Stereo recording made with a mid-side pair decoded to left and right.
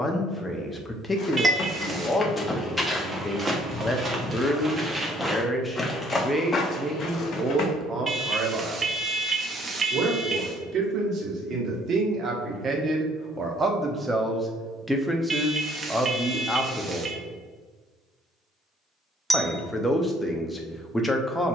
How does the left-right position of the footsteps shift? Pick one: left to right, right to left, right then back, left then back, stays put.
right then back.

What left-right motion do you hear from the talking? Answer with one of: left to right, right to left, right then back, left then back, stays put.
right then back.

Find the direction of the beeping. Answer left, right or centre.
right.